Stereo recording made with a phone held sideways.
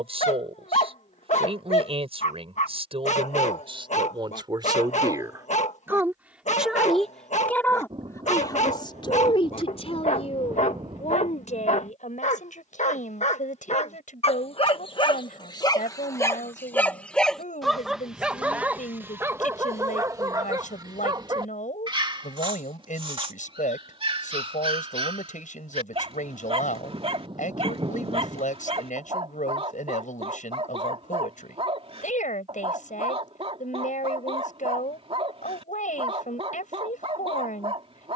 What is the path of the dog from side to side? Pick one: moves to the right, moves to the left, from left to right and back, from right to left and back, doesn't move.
moves to the right.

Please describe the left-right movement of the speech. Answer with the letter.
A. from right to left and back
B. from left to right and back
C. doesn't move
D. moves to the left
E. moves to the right
D.